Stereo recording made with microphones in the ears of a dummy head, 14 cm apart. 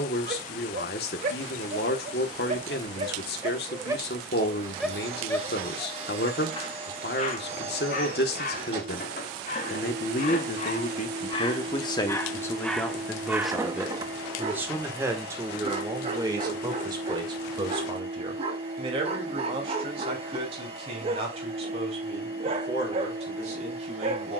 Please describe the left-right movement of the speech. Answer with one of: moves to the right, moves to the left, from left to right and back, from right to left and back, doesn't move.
moves to the right.